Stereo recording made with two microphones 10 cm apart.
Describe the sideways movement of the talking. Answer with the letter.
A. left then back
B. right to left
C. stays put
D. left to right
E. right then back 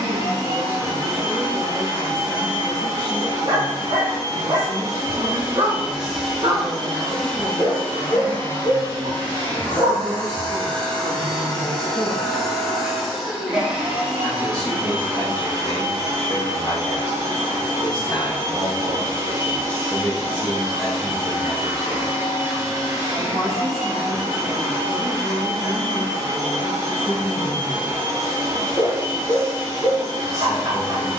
A.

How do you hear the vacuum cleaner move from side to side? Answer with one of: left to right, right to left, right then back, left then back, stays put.
left then back.